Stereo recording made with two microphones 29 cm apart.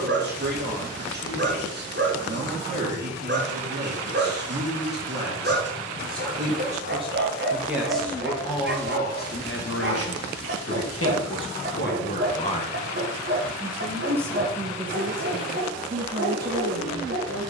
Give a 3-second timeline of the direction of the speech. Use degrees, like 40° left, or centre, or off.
30° right, 30° right, 10° right, 40° left, centre, 30° right.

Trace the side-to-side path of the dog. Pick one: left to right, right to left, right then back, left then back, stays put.
stays put.